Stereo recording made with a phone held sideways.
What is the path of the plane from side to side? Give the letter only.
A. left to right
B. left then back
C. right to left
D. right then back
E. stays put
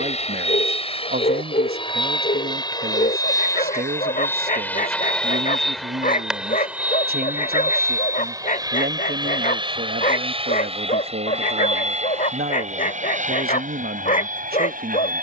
A.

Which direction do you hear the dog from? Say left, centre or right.
left.